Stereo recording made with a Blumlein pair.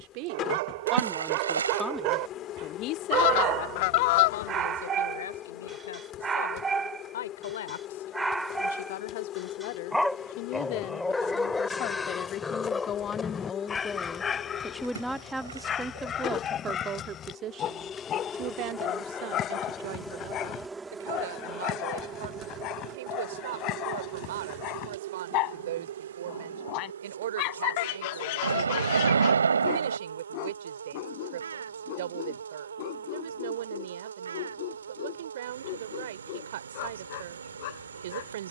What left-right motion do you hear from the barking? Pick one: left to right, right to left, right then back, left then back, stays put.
right to left.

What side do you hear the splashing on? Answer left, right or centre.
right.